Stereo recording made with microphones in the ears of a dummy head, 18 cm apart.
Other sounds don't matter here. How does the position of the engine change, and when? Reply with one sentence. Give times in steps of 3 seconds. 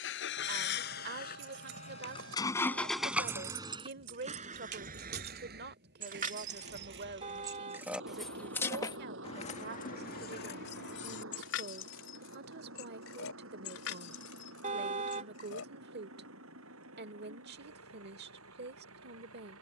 You can hear the engine on the left from 0 s and on the right from 3 s.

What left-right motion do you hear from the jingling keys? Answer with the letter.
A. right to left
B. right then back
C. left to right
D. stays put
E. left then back
A.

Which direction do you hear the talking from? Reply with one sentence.
You can hear the talking on the right.